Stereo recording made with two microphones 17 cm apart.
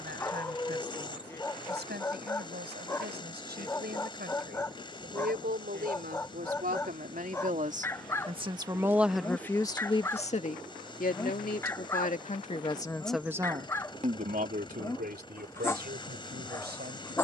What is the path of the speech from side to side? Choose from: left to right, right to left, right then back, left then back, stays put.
left then back.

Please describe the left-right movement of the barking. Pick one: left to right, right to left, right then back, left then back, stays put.
stays put.